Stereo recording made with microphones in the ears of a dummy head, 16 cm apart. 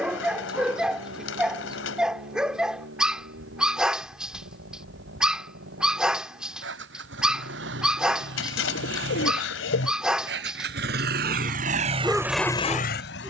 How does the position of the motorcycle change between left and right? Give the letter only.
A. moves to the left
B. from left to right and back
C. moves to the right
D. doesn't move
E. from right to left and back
A.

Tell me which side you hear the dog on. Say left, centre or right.
centre.